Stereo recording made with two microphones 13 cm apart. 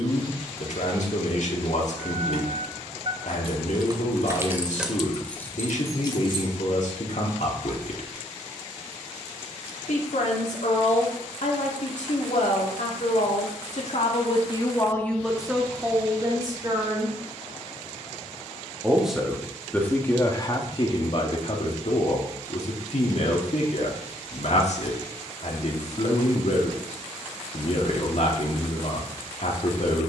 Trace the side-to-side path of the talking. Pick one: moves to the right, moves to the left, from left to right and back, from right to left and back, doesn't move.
from left to right and back.